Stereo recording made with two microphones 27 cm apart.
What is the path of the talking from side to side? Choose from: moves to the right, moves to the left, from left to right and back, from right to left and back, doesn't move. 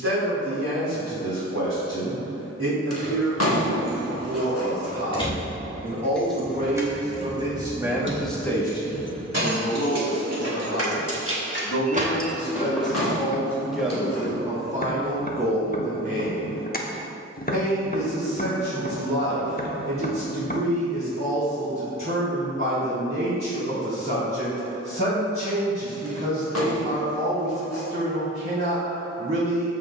from right to left and back.